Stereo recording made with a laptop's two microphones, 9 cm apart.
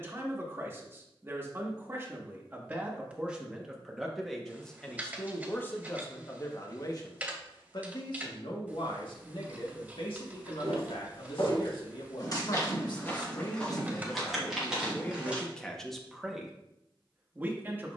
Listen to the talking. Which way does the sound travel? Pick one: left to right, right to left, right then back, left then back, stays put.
left then back.